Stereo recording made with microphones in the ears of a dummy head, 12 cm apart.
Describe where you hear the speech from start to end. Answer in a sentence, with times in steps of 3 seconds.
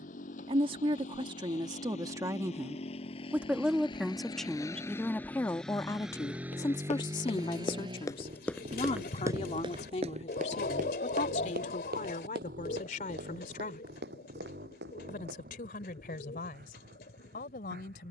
In this clip you hear the speech on the right from 0 s, in the centre from 3 s and on the left from 6 s.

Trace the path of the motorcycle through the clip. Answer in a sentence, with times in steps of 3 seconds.
In this clip you hear the motorcycle on the left from 0 s and on the right from 6 s.